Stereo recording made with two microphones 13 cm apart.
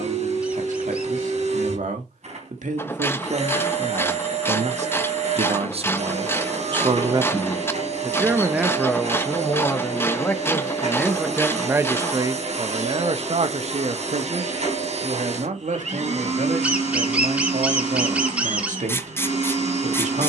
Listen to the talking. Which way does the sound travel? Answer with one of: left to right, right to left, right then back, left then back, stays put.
left then back.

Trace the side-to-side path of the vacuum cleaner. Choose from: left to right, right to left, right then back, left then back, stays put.
stays put.